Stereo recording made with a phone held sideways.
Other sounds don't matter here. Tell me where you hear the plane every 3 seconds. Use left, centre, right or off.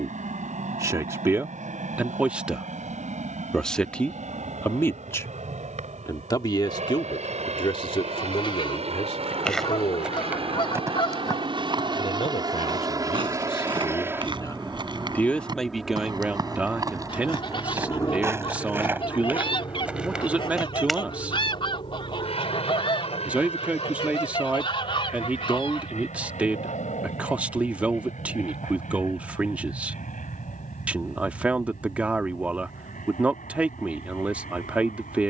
right, right, right, right, right, centre, left, left, left, left, left, left.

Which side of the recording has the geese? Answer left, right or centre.
left.